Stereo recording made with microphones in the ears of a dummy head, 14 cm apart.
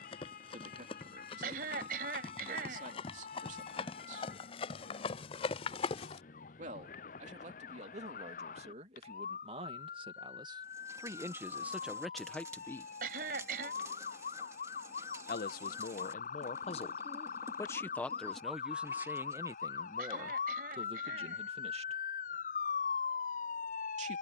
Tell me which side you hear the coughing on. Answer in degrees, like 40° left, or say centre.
60° right.